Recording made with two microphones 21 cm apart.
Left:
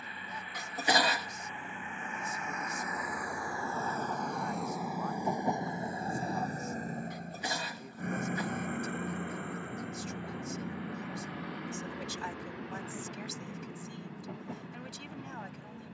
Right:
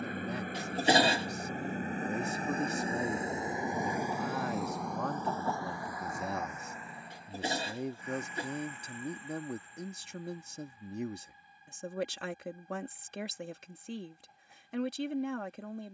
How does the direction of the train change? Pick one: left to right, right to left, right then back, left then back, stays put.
right to left.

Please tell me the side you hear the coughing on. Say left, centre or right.
right.